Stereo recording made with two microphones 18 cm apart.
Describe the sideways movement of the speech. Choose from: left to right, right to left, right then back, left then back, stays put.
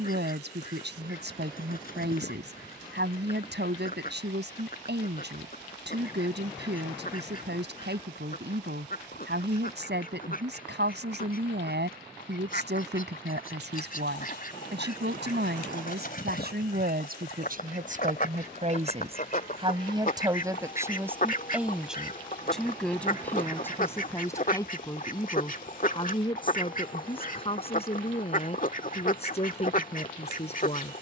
right to left.